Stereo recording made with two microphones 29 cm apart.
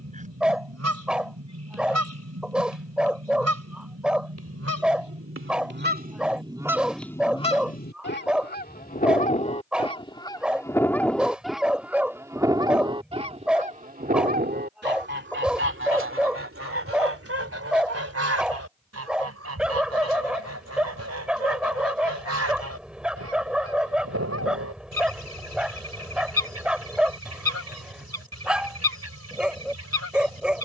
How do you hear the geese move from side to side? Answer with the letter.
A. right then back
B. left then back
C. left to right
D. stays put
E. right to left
B.